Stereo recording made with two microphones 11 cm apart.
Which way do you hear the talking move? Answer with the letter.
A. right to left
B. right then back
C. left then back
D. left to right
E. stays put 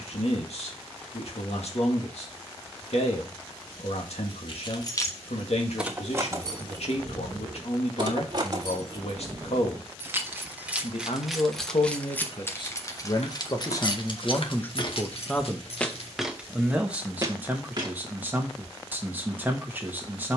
D.